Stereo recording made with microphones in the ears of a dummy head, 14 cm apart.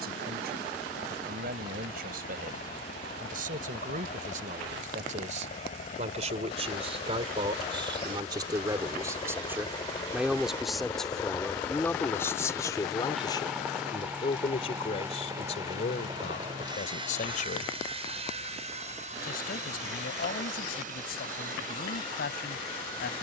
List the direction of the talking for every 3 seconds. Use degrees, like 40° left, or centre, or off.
60° right, 50° right, 30° right, centre, 30° left, 50° left, 60° left, 60° left.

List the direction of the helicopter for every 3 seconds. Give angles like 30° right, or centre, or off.
60° left, 50° left, 40° left, 20° left, centre, 30° right, 40° right, 50° right.